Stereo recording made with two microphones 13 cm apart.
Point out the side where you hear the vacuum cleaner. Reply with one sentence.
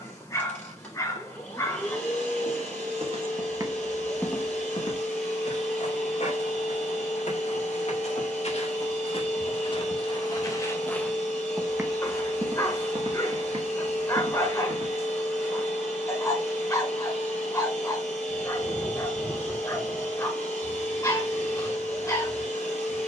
In this clip you hear the vacuum cleaner in the centre.